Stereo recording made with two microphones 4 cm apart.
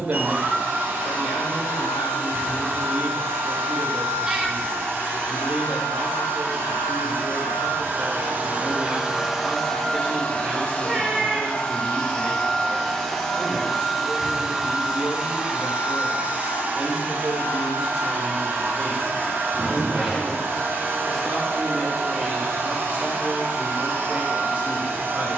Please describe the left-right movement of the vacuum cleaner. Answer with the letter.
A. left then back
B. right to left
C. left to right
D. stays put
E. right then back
A.